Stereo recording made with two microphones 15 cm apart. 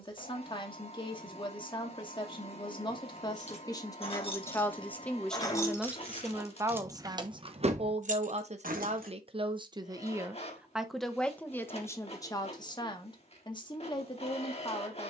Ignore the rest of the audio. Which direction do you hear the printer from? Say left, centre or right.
left.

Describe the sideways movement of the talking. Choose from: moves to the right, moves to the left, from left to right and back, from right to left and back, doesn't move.
from left to right and back.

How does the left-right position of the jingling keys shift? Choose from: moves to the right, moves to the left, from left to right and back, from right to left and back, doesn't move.
moves to the right.